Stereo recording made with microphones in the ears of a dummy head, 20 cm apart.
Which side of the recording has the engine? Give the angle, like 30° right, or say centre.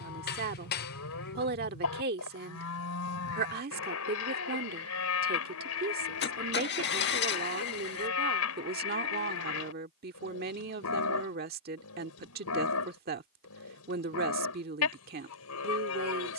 50° left.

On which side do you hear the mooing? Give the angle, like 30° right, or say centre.
70° left.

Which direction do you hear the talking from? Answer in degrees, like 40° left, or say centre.
40° right.